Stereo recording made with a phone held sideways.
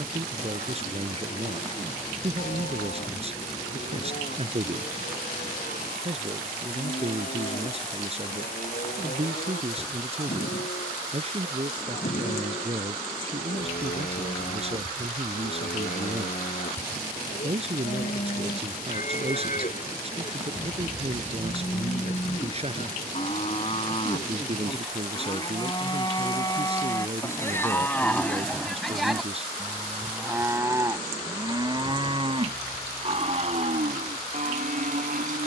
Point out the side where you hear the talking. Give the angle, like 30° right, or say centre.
40° right.